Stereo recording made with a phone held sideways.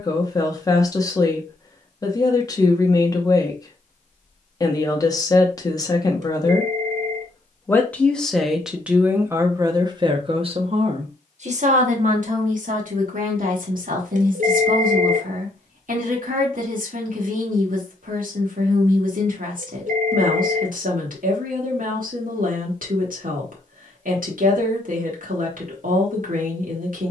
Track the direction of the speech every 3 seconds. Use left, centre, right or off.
left, left, centre, right, right, right, right, right, right.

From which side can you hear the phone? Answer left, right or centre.
right.